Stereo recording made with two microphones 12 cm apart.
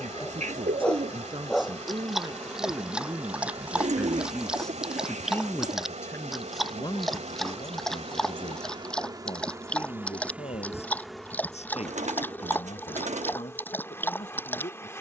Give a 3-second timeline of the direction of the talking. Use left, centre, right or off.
right, centre, left, left, left.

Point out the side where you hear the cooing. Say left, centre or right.
right.